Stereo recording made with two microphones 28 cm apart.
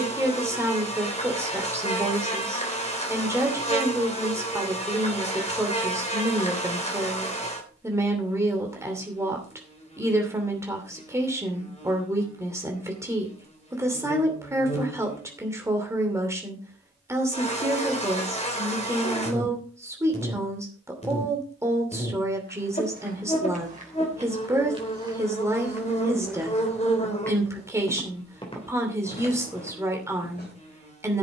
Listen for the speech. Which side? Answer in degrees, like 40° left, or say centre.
10° right.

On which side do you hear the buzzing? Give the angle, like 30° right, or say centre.
20° left.